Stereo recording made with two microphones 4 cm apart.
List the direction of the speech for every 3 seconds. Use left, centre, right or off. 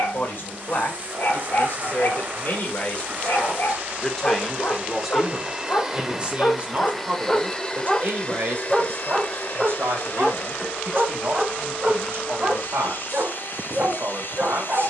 left, centre, right, right, right.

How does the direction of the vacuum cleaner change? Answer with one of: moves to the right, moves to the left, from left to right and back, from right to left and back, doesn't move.
moves to the left.